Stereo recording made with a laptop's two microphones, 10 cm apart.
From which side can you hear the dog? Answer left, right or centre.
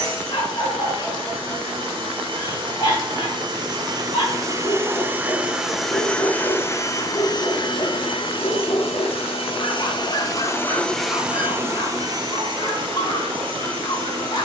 left.